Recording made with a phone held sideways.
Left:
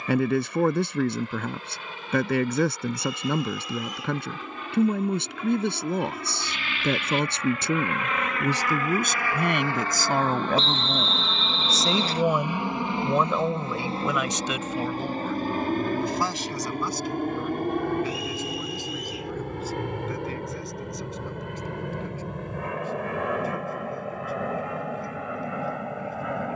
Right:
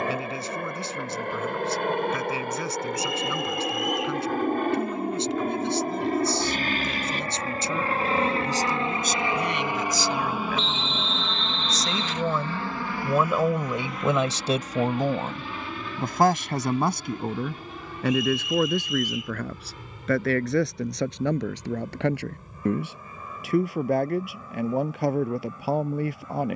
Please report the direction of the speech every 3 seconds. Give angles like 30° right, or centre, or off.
60° left, 60° left, 60° left, 50° left, 10° right, 60° right, 70° right, 80° right, 80° right.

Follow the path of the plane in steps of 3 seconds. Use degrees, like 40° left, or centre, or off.
70° right, 60° right, 40° right, 10° right, 20° left, 50° left, 60° left, 60° left, 70° left.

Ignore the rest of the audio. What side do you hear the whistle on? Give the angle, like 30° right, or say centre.
40° left.